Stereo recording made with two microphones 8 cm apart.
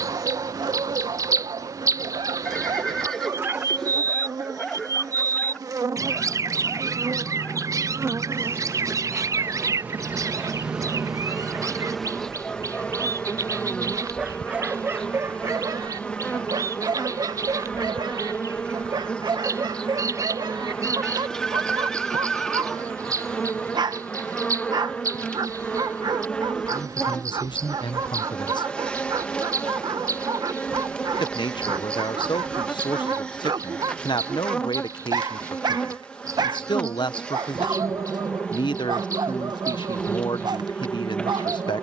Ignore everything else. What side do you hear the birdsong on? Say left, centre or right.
right.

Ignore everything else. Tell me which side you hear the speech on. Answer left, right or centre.
left.